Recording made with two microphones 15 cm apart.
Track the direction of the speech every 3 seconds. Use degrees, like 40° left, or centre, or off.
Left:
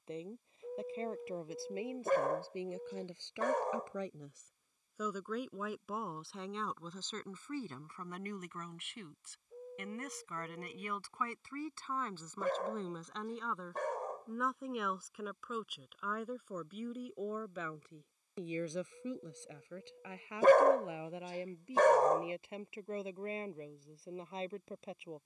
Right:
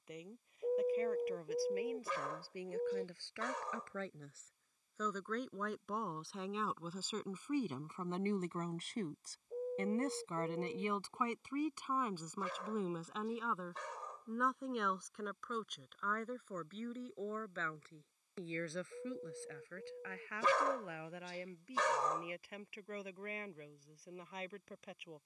20° left, 10° left, 20° right, 30° right, centre, 10° left, 20° left, 20° left, 30° left.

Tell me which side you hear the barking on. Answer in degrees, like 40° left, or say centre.
50° left.